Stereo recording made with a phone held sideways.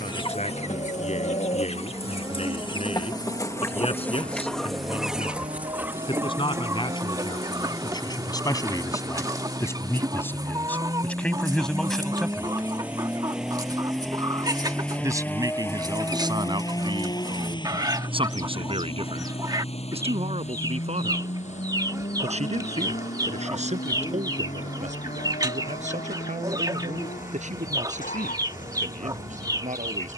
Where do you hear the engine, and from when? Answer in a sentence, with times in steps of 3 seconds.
You can hear the engine on the right from 0 s, in the centre from 12 s and on the left from 15 s.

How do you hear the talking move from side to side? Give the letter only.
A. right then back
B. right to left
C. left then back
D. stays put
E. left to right
E.